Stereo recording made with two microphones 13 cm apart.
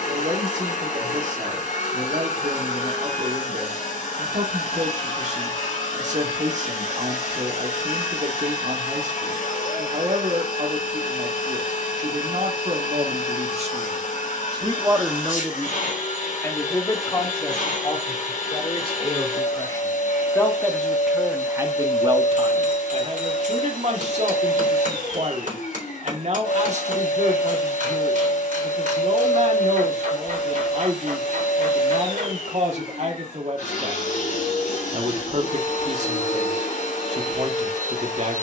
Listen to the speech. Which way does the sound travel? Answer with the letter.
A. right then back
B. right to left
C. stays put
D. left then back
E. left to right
D.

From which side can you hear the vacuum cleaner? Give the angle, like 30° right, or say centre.
70° left.